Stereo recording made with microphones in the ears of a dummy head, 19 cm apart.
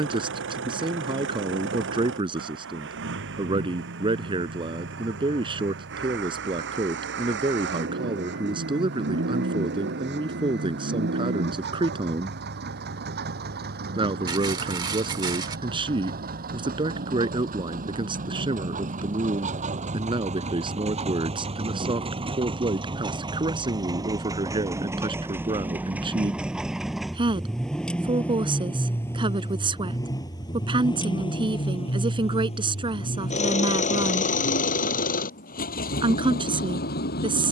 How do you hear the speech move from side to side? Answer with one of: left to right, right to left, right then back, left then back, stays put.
stays put.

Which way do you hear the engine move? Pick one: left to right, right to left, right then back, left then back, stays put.
right to left.